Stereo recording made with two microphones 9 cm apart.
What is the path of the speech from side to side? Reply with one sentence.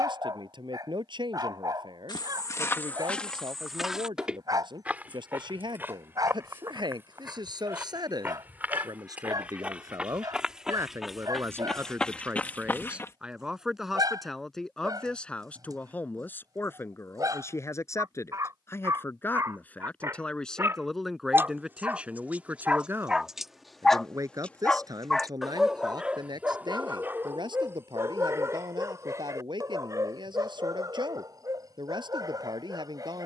In this clip you hear the speech move from right to left and back again.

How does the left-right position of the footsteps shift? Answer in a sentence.
In this clip you hear the footsteps move from left to right and back again.